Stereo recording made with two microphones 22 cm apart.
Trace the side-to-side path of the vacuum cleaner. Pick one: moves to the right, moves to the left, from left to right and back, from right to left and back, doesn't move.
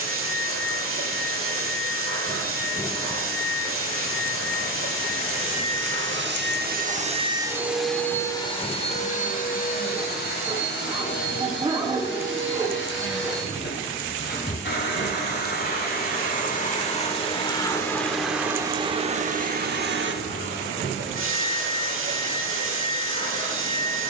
from right to left and back.